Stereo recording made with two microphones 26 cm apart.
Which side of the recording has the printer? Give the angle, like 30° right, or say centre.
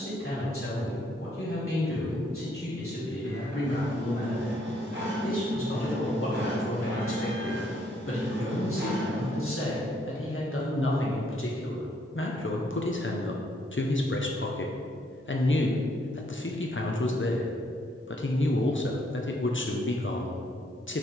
50° right.